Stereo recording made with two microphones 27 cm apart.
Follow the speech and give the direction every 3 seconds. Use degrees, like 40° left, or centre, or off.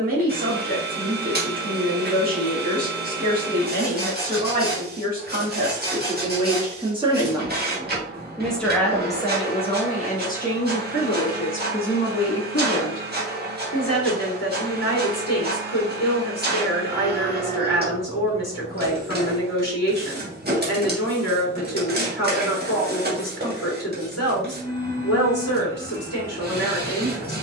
30° right, 30° right, 10° right, 30° left, 70° left, 70° left, 70° left, 70° left, 70° left.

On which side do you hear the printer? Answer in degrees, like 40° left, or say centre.
40° right.